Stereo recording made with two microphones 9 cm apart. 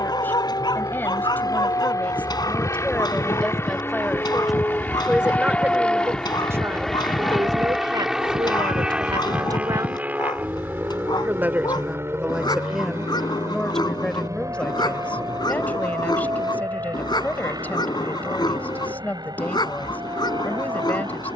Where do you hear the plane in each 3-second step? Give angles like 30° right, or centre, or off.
40° left, 20° left, centre, 20° right, 30° right, 40° right, 50° right.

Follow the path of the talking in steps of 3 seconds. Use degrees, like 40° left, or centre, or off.
20° left, centre, 40° right, 40° right, centre, 20° left, 20° left.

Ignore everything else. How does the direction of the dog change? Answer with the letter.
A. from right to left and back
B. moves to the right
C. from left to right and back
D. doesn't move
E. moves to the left
D.